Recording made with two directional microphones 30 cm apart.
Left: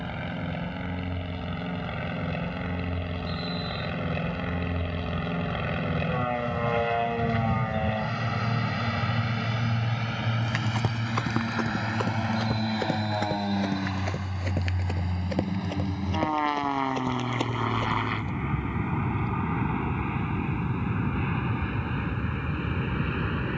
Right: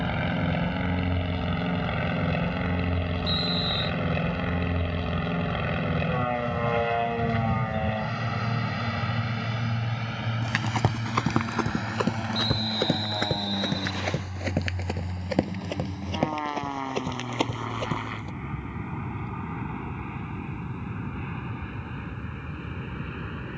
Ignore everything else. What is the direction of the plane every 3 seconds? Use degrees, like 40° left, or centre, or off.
40° right, 20° right, centre, 20° left, 30° left, 40° left, 40° left, 50° left.